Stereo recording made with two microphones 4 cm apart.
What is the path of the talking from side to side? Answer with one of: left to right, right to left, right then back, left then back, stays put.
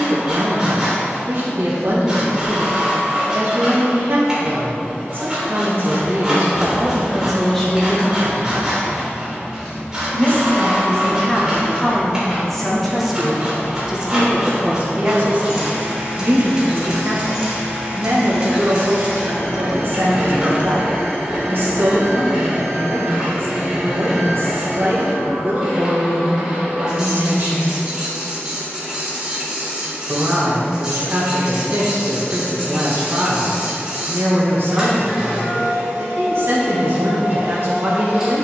left then back.